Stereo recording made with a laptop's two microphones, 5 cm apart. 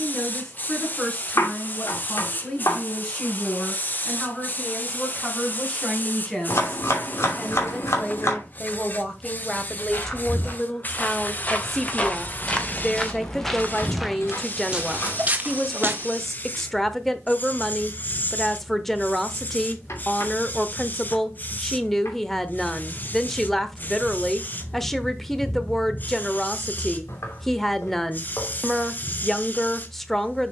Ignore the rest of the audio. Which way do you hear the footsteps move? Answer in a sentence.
You can hear the footsteps go from the left side to the right.